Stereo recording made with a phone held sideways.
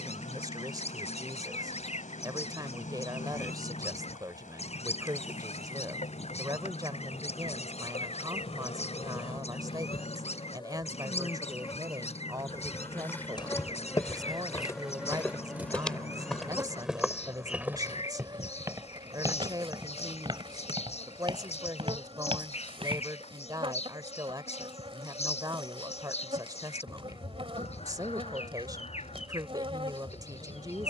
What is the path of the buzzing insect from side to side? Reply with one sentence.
You can hear the buzzing insect go from the left side to the right.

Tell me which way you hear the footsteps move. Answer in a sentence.
You can hear the footsteps move to the right.